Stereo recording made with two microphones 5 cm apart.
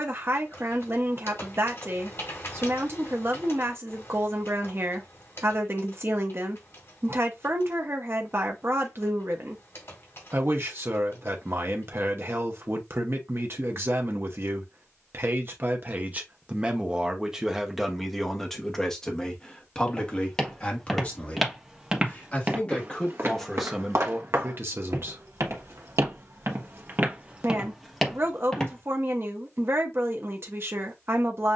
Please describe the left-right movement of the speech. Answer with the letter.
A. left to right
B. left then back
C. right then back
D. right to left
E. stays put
B.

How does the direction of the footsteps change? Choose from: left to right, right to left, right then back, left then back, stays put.
right then back.